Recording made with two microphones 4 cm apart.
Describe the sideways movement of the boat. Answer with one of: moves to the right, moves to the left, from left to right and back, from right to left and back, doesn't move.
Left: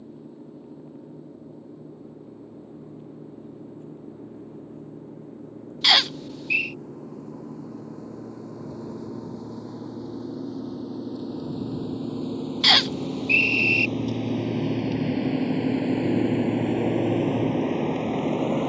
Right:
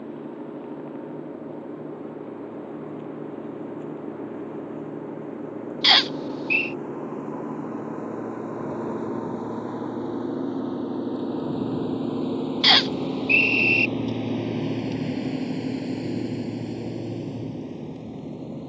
moves to the left.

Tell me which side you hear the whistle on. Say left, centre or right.
centre.